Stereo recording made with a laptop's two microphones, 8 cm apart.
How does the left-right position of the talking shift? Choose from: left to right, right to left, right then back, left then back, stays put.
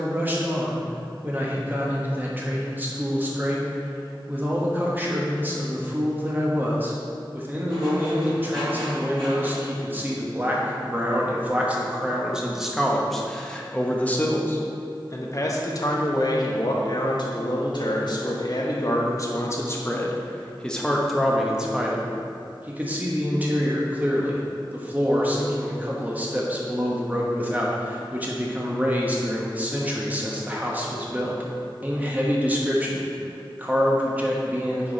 left then back.